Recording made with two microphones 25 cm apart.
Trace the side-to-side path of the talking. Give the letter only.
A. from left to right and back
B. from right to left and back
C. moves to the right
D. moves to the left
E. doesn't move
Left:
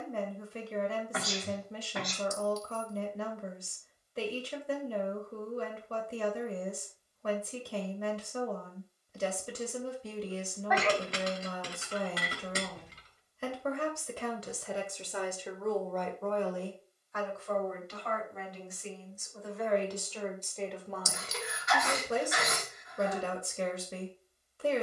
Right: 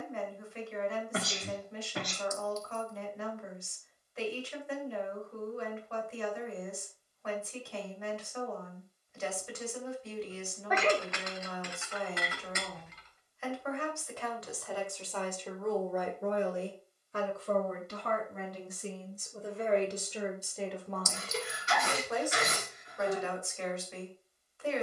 A.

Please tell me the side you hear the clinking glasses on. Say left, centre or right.
left.